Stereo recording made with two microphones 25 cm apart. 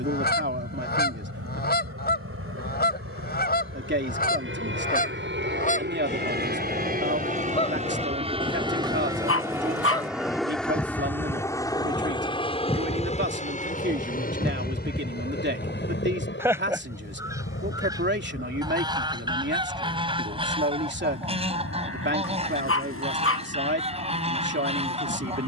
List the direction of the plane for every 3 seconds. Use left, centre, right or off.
right, right, right, centre, left, left, left, left, left.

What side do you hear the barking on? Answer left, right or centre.
left.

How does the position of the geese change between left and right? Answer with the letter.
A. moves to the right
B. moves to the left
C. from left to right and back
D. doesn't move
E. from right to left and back
A.